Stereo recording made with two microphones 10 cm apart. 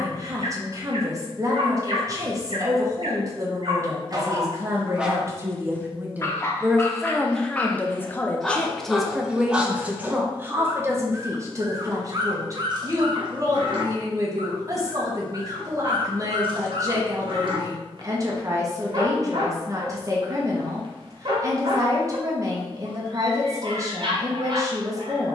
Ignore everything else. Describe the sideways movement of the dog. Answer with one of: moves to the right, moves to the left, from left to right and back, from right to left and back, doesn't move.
from right to left and back.